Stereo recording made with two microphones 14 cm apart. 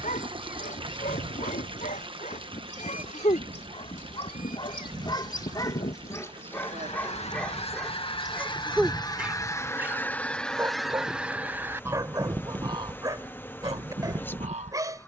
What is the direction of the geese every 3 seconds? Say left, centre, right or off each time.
left, left, left, centre, right.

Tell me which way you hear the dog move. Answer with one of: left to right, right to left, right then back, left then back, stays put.
left to right.